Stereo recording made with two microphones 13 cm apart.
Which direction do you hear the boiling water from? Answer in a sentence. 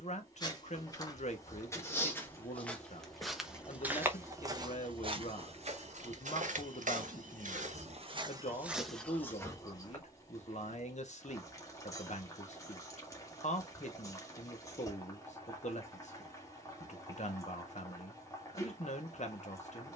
You can hear the boiling water on the left.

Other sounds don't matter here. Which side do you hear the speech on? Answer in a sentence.
In this clip you hear the speech on the left.